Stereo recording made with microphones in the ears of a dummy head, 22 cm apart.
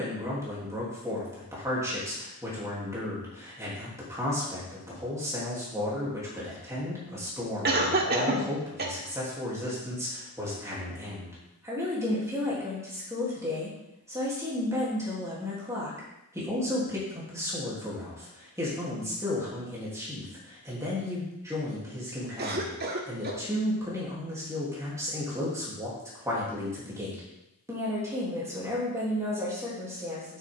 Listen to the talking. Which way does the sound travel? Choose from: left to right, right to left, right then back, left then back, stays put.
stays put.